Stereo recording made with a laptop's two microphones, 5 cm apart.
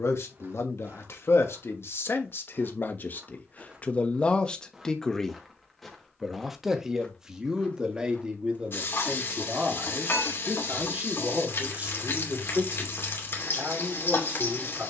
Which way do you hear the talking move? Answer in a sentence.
You can hear the talking move from left to right.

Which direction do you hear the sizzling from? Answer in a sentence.
In this clip you hear the sizzling on the left.